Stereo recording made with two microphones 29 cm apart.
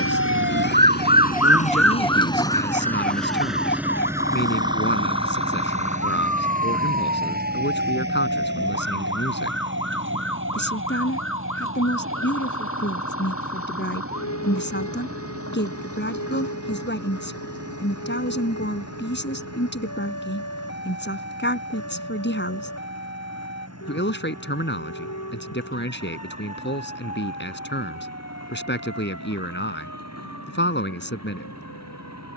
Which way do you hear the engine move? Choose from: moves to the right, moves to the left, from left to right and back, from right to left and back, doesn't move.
moves to the right.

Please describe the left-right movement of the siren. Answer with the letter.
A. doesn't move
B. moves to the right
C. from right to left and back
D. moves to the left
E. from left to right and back
D.